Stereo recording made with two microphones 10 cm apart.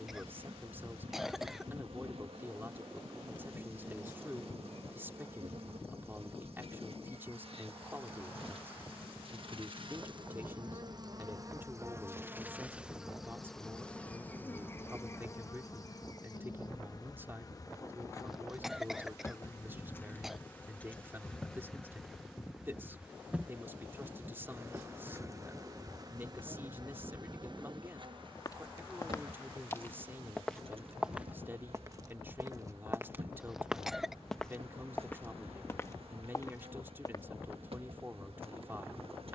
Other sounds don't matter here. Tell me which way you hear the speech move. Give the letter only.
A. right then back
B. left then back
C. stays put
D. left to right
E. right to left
C.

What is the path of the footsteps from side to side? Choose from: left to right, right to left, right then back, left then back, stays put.
right then back.